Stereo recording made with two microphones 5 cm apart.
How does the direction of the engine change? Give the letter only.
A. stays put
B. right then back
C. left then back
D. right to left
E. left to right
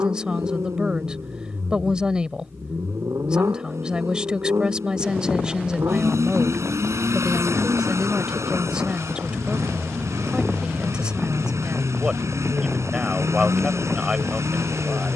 A.